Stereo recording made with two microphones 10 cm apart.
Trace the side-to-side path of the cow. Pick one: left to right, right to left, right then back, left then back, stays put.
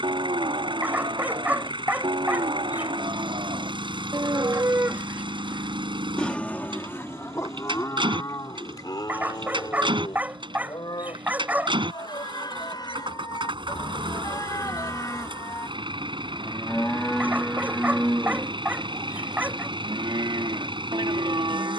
left then back.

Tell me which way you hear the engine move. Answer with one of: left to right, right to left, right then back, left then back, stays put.
stays put.